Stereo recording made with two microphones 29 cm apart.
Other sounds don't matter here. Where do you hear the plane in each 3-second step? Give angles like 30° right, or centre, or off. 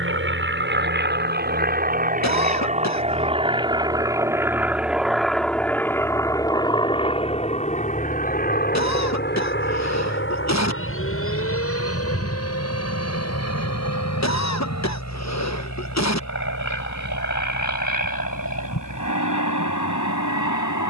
30° right, 10° right, 20° left, 40° left, 50° left, 60° left, 60° left.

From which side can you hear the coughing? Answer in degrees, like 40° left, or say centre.
60° left.